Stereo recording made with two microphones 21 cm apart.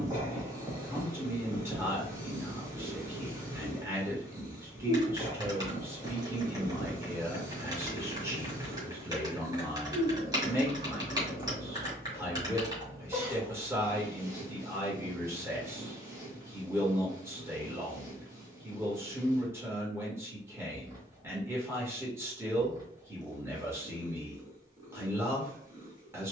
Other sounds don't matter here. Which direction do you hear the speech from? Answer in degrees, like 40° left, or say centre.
10° right.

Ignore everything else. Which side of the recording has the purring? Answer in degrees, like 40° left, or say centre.
20° right.